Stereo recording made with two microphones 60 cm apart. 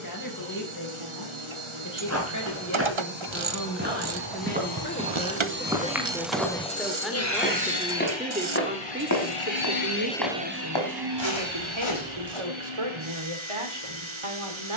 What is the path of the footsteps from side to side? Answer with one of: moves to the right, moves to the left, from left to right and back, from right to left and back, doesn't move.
moves to the left.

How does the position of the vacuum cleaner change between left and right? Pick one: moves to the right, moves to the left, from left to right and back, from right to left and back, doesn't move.
from right to left and back.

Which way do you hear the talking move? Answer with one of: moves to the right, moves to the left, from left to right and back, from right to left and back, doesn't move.
moves to the right.